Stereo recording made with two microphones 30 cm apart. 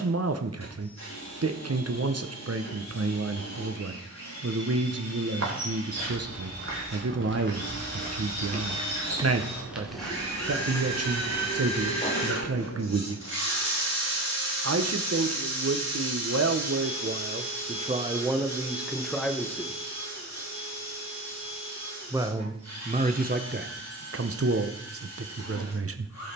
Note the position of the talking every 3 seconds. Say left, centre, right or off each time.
right, right, right, right, right, right, centre, right, right.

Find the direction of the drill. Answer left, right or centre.
left.